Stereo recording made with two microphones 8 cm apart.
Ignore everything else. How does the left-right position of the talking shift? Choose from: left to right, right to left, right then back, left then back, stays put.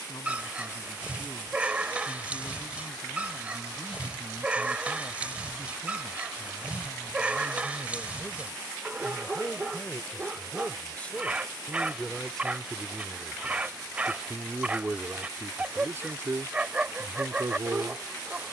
left to right.